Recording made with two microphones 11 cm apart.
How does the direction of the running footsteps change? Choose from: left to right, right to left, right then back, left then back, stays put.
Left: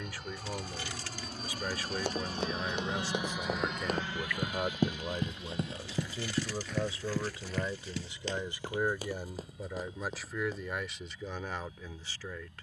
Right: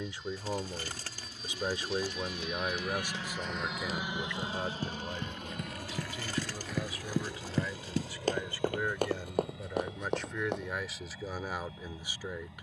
left to right.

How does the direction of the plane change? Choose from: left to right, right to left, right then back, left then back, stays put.
left to right.